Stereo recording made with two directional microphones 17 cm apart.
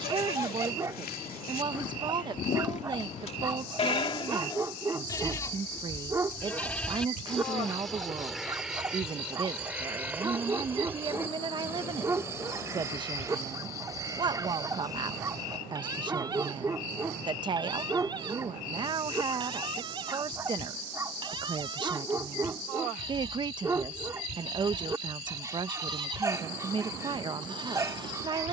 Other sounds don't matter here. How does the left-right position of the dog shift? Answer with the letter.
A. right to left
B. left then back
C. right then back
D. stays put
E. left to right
D.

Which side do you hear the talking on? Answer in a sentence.
In this clip you hear the talking on the right.